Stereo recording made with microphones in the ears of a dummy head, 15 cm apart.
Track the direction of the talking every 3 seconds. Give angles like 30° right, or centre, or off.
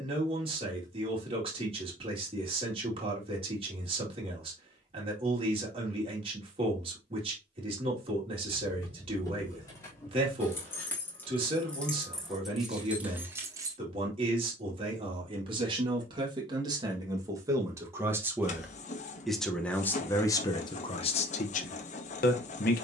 30° right, 30° right, 30° right, 30° right, 30° right, 30° right, 10° left, 50° left.